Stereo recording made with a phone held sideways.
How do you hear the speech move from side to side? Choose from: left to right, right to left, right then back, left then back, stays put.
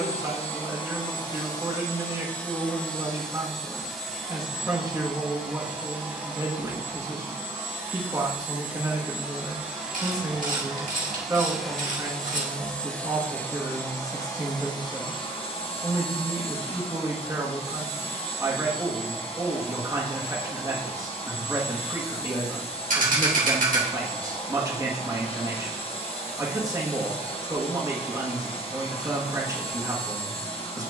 stays put.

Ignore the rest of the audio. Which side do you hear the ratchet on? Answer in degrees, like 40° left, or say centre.
60° right.